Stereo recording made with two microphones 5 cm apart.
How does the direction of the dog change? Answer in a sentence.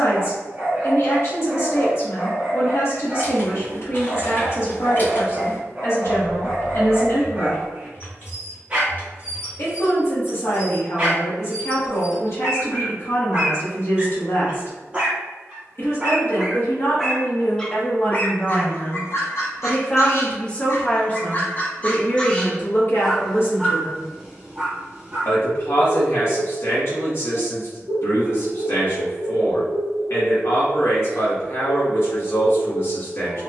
You can hear the dog move from right to left and back again.